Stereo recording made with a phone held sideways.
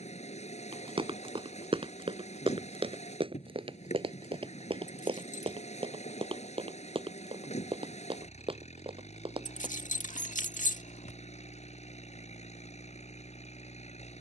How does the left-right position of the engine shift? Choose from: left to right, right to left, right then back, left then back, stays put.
stays put.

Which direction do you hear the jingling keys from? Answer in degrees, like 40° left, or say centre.
70° left.